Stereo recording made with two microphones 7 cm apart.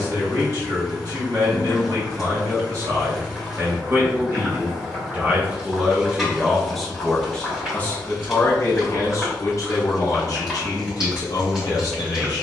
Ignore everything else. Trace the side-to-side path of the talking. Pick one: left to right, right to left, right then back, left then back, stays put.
right to left.